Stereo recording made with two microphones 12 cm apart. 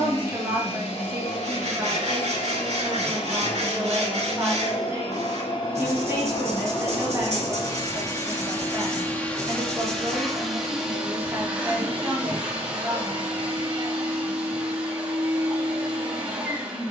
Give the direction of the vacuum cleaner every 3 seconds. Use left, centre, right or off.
left, left, left, centre, centre, centre.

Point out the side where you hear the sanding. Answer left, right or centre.
right.